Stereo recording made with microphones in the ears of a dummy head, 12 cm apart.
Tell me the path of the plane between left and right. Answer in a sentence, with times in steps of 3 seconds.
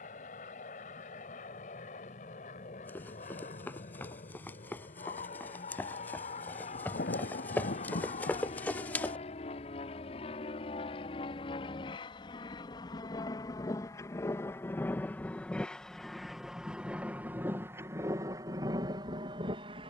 In this clip you hear the plane on the left from 0 s, in the centre from 15 s and on the right from 18 s.